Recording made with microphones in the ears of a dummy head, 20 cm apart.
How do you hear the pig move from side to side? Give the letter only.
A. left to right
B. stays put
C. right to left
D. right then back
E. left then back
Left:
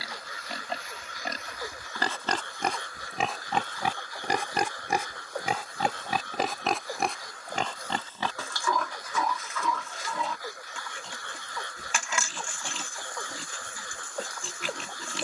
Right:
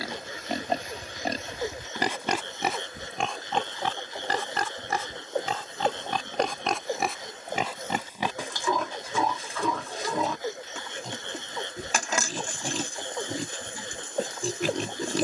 E.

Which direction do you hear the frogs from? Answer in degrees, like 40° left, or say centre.
20° right.